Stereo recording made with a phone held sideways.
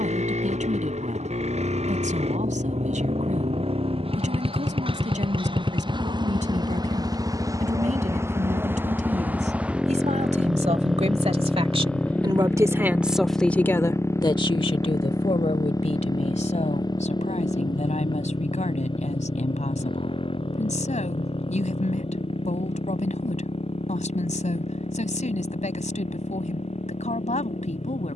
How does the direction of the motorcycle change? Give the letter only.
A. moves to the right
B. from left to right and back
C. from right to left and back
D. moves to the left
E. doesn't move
D.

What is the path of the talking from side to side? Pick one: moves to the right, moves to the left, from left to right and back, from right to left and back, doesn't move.
moves to the left.